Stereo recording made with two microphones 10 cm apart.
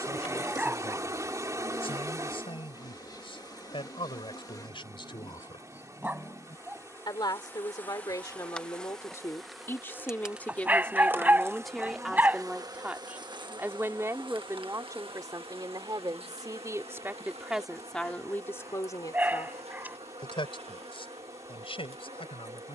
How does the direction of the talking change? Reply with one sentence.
In this clip you hear the talking go right and come back.